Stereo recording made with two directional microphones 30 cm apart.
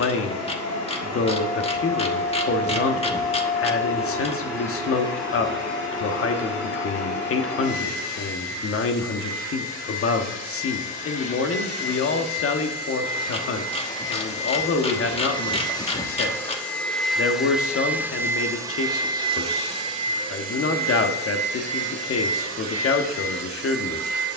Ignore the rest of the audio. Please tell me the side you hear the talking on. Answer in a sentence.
In this clip you hear the talking on the left.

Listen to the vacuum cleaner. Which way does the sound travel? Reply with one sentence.
You can hear the vacuum cleaner go from the left side to the right.